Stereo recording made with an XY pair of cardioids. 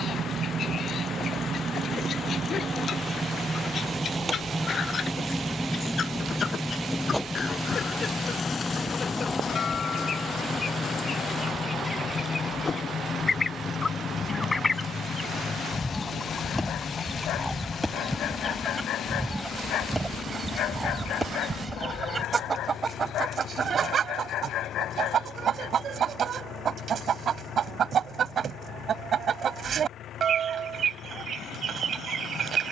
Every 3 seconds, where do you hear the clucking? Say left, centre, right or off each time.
left, left, left, left, left, centre, centre, right, right, right, right.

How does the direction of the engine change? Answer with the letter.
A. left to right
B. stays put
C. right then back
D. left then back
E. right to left
E.